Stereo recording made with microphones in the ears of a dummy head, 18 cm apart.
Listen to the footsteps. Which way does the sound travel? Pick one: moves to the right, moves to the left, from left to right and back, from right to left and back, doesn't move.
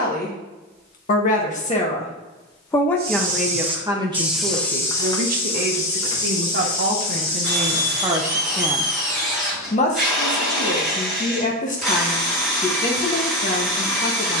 moves to the left.